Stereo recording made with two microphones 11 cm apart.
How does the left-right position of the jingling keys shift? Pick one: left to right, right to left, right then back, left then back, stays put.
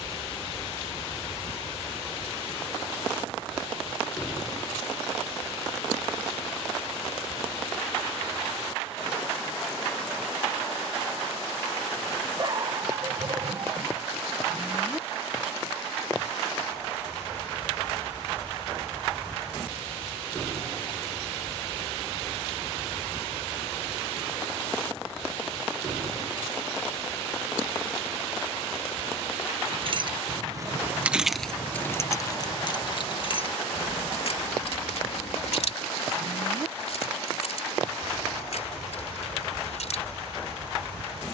right to left.